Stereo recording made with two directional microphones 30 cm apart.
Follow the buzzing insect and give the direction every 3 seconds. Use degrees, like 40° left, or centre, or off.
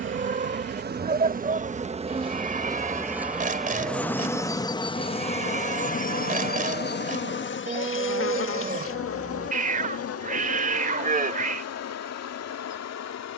30° right, 10° left, 40° left, 60° left, 60° left.